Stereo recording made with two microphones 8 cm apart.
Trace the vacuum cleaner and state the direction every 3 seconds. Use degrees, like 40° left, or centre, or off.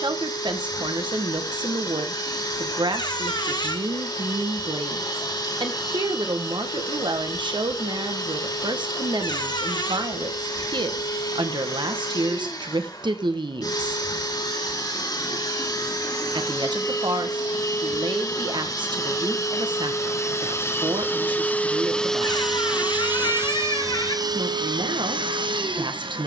60° left, 60° left, 60° left, 60° left, 60° left, 50° left, 40° left, centre, 70° right.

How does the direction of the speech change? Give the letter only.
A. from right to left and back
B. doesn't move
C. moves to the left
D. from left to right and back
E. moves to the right
B.